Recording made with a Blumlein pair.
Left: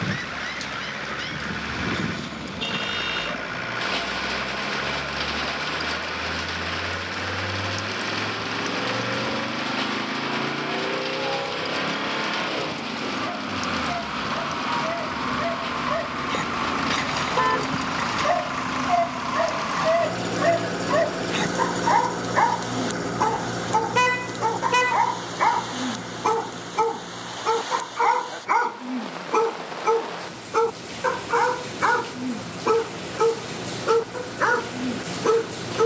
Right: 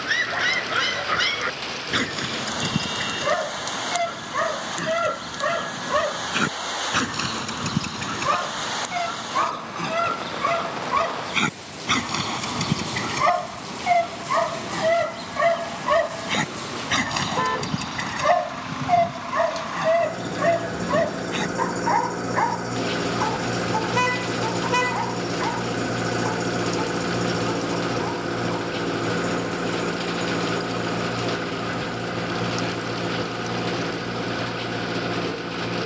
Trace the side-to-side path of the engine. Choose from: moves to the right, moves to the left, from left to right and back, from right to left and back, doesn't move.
moves to the right.